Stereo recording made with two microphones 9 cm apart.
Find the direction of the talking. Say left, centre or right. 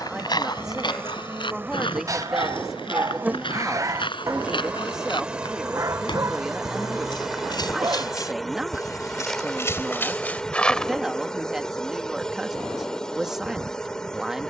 centre.